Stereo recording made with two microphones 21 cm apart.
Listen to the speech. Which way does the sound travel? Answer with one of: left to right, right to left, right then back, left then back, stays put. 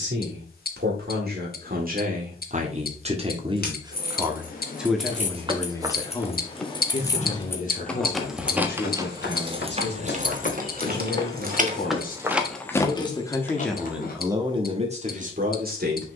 left then back.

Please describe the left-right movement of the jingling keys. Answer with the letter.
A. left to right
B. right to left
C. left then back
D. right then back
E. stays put
D.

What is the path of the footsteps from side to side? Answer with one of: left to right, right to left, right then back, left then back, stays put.
left then back.